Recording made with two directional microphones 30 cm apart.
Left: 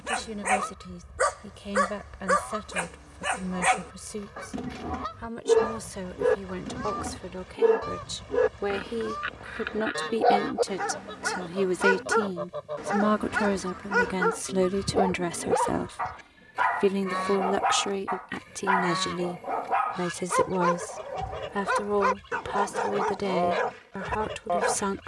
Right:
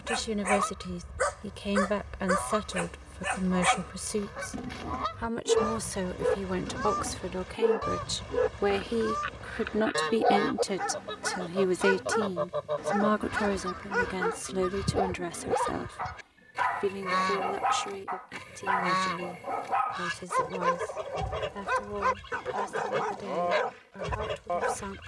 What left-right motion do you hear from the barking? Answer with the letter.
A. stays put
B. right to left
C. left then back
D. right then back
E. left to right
A.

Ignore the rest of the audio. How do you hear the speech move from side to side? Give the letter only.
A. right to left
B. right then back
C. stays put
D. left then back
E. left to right
A.